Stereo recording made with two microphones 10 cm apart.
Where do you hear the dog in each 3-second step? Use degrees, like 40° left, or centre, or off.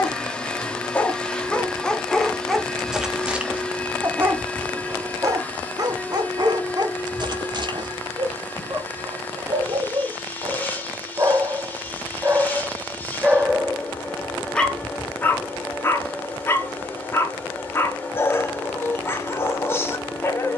10° left, 20° right, 50° right, 40° right, 10° right, 20° left, 30° left.